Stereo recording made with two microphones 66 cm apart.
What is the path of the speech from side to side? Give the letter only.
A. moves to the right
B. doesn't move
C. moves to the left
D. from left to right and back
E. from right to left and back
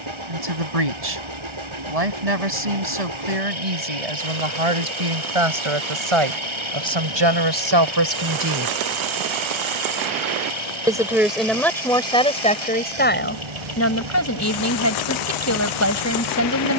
C.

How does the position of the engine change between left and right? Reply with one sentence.
In this clip you hear the engine stay in one place.